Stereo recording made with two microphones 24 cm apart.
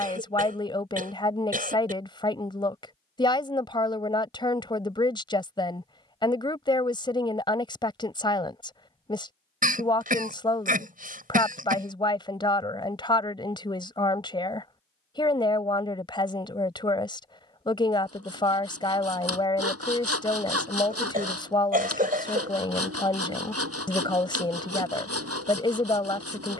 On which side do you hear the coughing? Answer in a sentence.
You can hear the coughing on the right.